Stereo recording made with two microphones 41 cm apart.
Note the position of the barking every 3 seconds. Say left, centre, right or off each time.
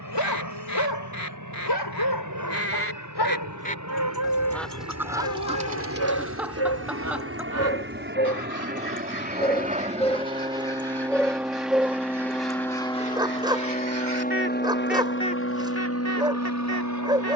left, left, left, centre, centre, centre.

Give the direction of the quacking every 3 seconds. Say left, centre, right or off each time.
left, centre, right, right, right, left.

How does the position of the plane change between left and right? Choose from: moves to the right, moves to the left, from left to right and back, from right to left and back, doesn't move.
moves to the left.